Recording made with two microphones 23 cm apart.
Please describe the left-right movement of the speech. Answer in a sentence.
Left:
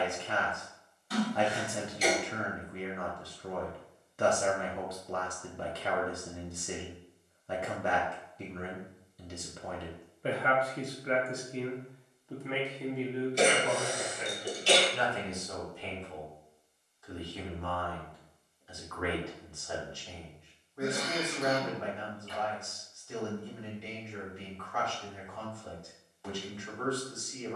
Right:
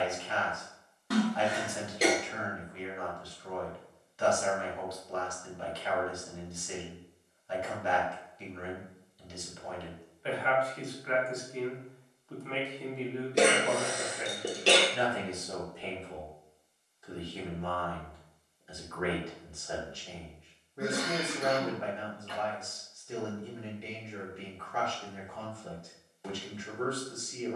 In this clip you hear the speech move from left to right.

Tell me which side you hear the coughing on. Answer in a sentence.
You can hear the coughing on the right.